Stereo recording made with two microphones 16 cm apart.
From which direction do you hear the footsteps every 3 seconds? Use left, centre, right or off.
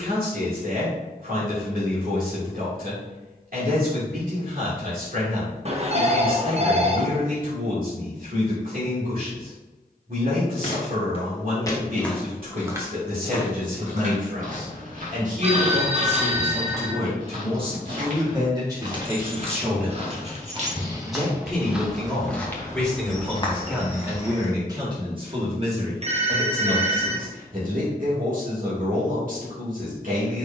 off, off, off, left, right, right, right, centre, left, off.